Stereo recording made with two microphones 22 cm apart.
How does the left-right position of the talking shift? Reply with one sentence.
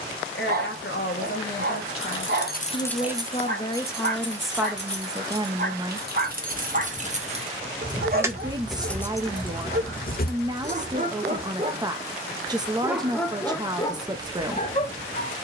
You can hear the talking move from left to right.